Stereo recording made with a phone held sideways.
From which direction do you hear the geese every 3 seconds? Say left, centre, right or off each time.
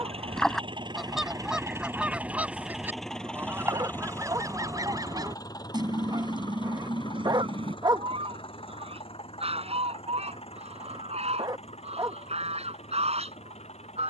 centre, right, right, right, right.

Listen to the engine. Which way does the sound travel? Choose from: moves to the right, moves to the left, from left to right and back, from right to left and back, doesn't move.
moves to the left.